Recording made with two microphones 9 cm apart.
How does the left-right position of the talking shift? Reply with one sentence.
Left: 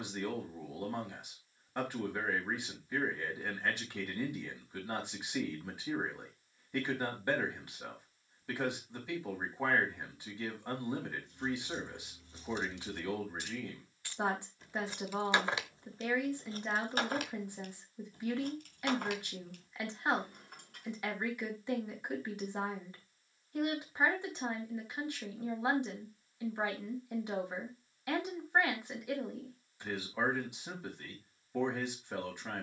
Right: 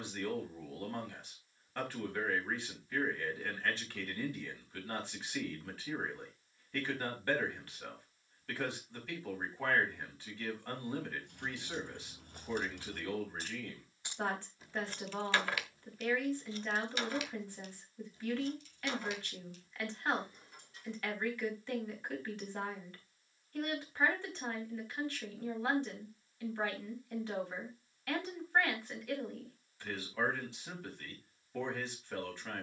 You can hear the talking stay in one place.